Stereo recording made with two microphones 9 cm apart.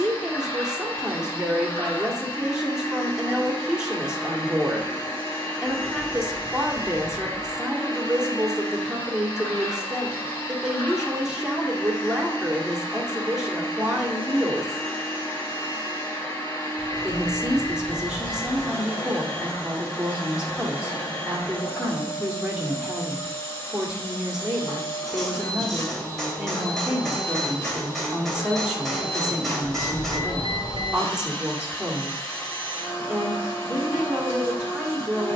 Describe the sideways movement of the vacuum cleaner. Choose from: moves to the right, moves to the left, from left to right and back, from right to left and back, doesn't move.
doesn't move.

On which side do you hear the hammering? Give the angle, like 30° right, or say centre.
centre.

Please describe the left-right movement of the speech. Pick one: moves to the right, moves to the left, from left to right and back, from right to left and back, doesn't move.
doesn't move.